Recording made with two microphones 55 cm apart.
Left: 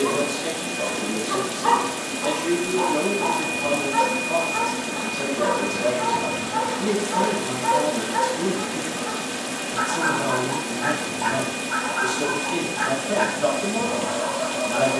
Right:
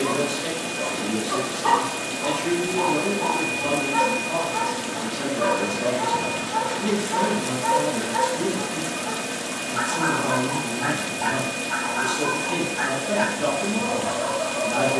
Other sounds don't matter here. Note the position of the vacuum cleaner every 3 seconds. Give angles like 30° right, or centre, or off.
20° right, 10° left, 60° left, 70° left, 70° left.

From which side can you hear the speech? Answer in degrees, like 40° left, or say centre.
50° right.